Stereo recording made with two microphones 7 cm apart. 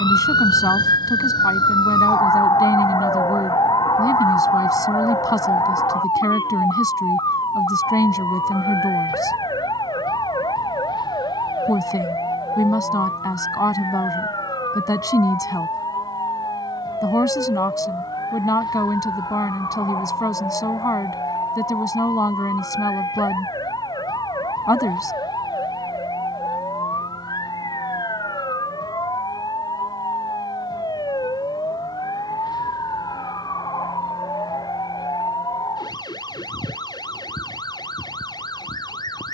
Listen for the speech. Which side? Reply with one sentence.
In this clip you hear the speech on the left.